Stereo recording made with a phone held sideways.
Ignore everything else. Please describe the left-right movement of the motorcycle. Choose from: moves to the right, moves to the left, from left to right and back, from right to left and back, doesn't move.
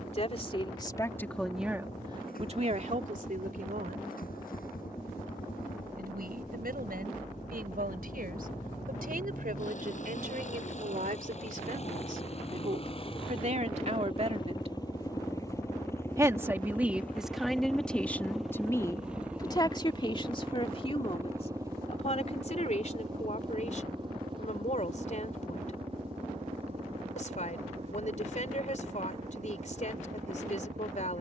moves to the right.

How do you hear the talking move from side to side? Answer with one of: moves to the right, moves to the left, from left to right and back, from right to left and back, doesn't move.
from left to right and back.